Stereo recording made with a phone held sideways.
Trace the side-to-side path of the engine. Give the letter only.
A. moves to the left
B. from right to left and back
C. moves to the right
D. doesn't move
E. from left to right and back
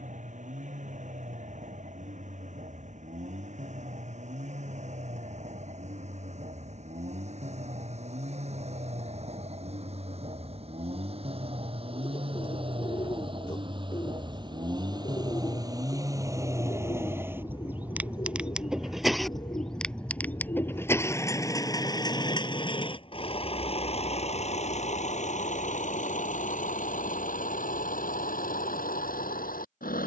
A.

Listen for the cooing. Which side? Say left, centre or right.
left.